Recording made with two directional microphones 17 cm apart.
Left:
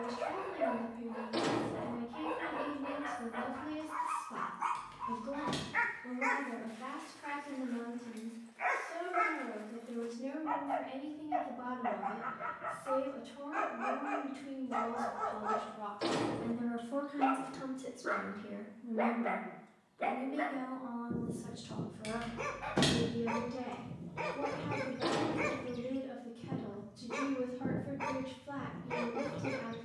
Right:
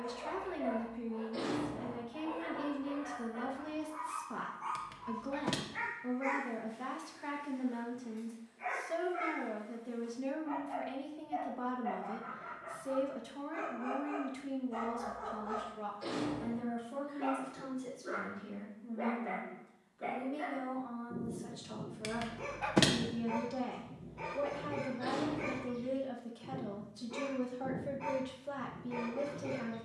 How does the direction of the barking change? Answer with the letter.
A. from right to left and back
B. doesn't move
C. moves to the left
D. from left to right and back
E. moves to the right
B.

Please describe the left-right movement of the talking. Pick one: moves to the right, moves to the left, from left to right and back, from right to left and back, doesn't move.
from right to left and back.